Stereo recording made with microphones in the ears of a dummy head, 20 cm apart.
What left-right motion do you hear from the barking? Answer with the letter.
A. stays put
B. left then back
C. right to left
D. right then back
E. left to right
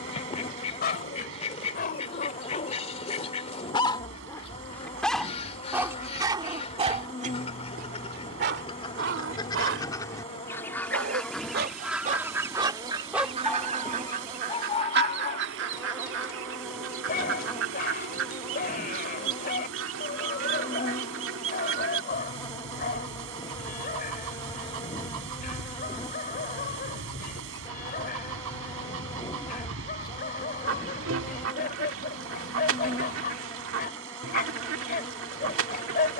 D.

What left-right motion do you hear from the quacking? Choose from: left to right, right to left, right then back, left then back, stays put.
left to right.